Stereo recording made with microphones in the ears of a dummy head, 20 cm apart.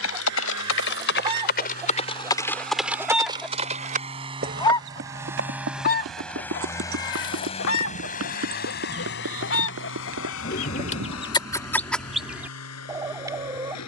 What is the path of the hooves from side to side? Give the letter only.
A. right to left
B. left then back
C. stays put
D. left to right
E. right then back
D.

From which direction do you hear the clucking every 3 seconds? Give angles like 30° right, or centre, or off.
20° right, 20° left, 60° left, 30° left, 10° right.